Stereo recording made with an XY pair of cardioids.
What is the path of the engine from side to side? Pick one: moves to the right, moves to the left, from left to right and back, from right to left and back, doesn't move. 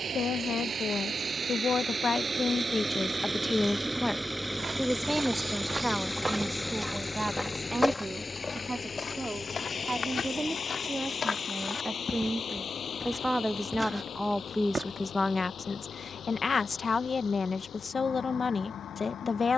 moves to the left.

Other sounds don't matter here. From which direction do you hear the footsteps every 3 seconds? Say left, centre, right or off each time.
off, right, centre, left, centre, off, off.